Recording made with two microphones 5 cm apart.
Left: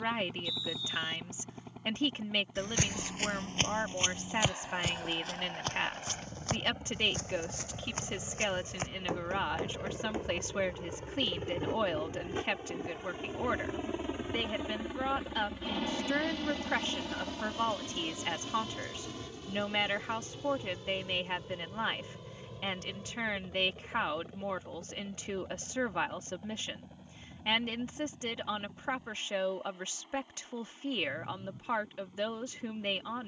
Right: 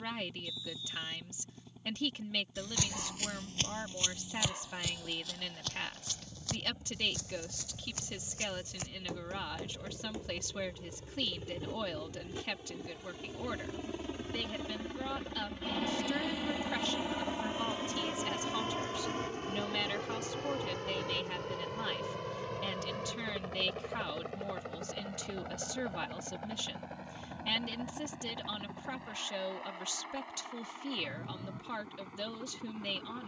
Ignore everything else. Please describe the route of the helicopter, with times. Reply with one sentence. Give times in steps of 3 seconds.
In this clip you hear the helicopter on the left from 0 s, in the centre from 15 s and on the right from 18 s.